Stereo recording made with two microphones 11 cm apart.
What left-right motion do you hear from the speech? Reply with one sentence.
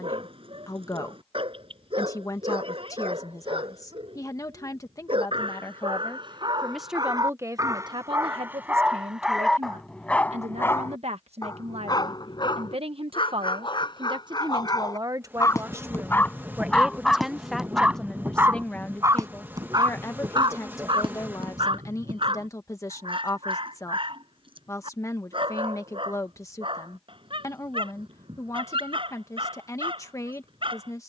You can hear the speech move from left to right and back again.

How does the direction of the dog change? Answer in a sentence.
In this clip you hear the dog go left and come back.